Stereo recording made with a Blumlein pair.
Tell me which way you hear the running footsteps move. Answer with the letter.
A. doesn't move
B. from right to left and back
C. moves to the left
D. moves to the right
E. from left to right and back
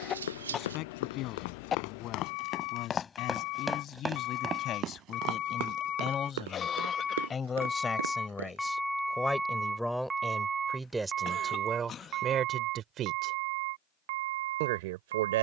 D.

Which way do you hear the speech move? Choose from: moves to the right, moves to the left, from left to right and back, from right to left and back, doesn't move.
moves to the right.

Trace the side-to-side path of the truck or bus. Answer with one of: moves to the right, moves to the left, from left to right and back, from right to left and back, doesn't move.
moves to the right.